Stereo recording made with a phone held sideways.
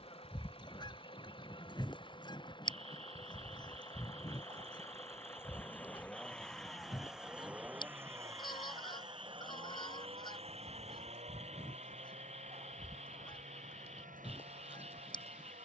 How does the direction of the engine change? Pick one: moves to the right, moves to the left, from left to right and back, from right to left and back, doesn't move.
moves to the right.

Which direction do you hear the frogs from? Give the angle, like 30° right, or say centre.
50° right.